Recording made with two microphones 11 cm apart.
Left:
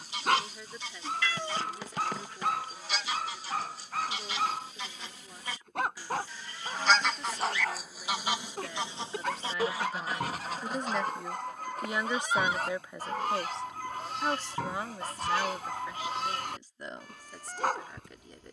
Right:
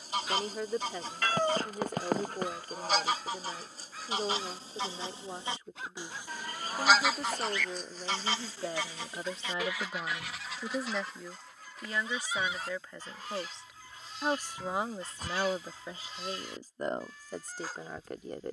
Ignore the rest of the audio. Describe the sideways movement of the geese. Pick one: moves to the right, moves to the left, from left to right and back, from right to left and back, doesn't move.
moves to the left.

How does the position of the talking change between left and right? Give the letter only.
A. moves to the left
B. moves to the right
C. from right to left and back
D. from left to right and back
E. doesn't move
C.